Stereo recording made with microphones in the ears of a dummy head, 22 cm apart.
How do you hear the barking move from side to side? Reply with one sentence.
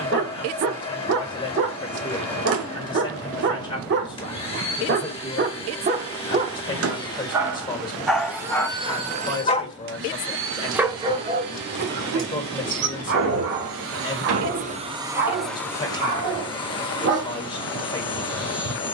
You can hear the barking go left and come back.